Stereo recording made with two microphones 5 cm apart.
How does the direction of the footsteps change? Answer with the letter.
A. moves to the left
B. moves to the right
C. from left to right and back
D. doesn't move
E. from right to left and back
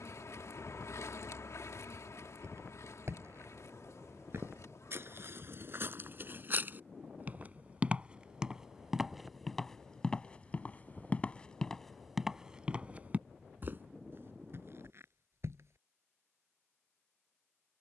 E.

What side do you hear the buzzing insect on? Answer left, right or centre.
left.